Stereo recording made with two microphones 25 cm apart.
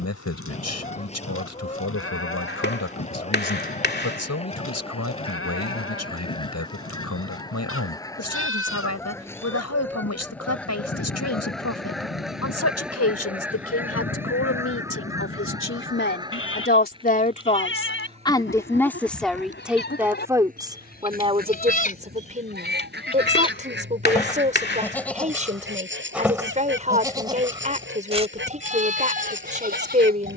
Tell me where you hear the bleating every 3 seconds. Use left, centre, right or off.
left, left, left, left, left, left, left, left, centre, right.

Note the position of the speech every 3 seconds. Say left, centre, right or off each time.
left, left, left, left, left, left, centre, right, right, right.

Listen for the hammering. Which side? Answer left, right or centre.
left.